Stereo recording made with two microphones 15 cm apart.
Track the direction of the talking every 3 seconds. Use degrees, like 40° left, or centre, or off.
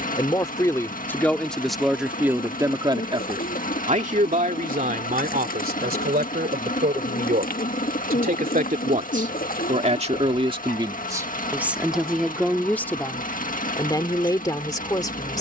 centre, 60° right, 70° right, 30° right, 20° left.